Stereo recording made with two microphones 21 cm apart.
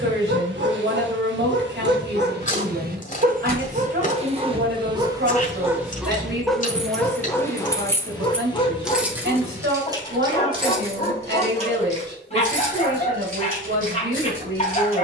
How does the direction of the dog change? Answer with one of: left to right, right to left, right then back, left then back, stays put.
right to left.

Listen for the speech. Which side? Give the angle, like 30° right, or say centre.
60° right.